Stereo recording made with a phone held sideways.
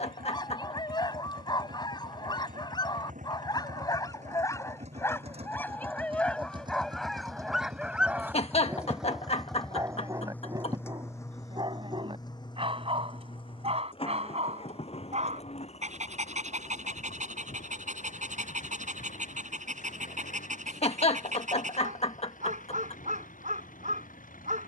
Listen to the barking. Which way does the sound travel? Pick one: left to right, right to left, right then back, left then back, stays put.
left to right.